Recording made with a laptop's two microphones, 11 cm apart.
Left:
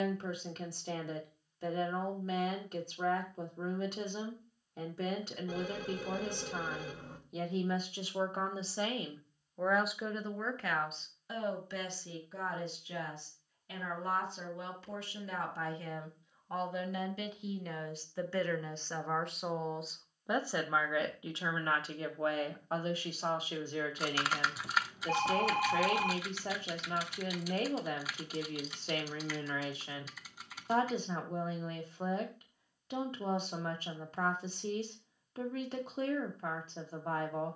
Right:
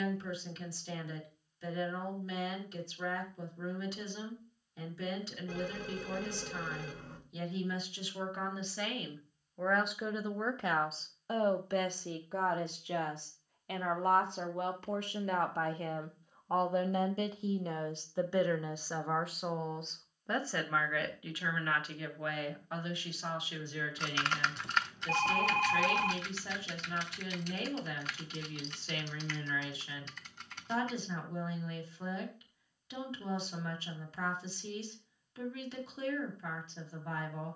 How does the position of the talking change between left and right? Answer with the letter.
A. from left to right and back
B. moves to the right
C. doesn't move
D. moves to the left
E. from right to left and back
A.